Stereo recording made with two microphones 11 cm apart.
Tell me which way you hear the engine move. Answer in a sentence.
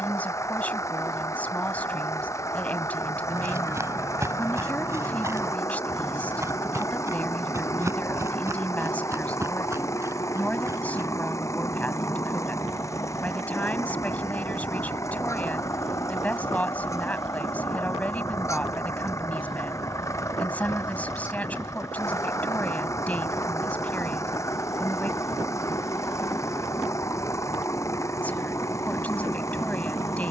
In this clip you hear the engine stay in one place.